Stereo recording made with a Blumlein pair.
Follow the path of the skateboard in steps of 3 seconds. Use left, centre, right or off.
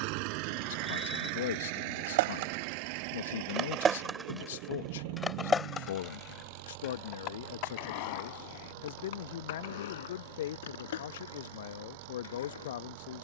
right, centre, left, left, left.